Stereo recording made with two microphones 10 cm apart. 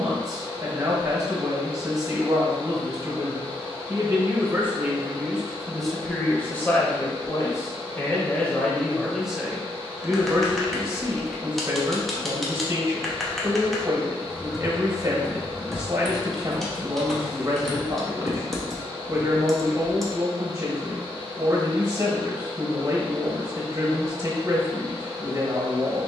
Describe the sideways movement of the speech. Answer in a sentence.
In this clip you hear the speech move from right to left and back again.